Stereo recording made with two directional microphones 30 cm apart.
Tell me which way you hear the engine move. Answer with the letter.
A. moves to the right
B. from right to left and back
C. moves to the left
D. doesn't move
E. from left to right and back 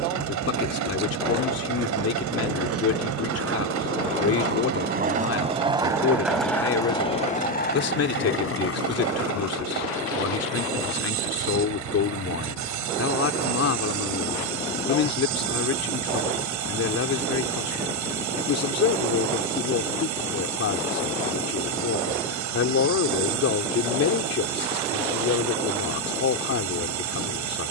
D.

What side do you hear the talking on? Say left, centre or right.
left.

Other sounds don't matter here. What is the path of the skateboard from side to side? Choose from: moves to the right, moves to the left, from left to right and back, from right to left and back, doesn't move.
moves to the left.